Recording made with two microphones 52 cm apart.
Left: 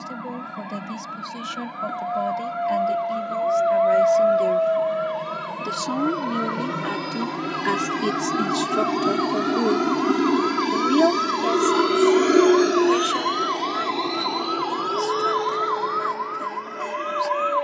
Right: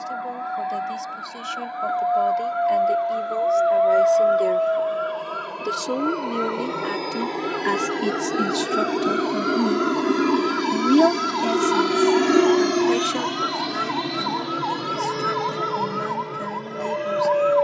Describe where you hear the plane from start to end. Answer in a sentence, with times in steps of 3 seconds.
You can hear the plane on the left from 0 s, in the centre from 9 s and on the right from 12 s.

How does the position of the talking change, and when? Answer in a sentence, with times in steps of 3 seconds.
In this clip you hear the talking on the left from 0 s, in the centre from 6 s and on the right from 9 s.